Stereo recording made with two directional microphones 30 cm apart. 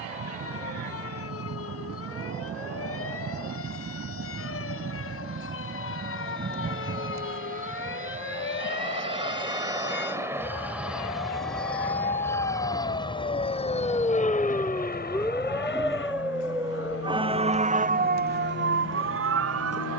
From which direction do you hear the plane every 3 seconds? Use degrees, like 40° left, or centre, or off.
50° right, 40° right, 30° right, 10° right, 20° left, 40° left, 50° left.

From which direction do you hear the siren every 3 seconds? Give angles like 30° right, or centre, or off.
50° left, 50° left, 40° left, 30° left, 20° left, 10° right, 40° right.